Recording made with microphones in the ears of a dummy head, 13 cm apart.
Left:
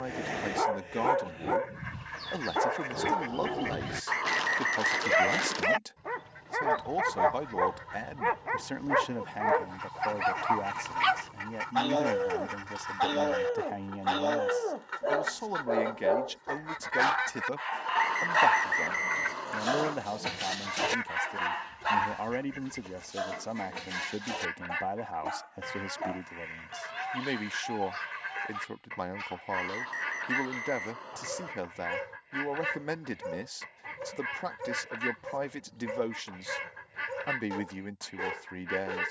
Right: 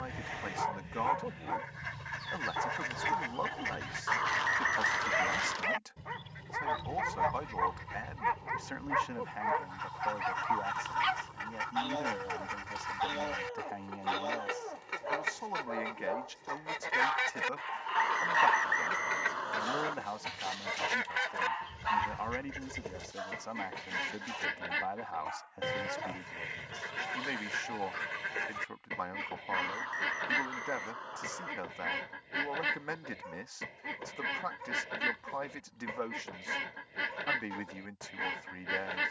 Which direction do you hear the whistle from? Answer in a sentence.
You can hear the whistle in the centre.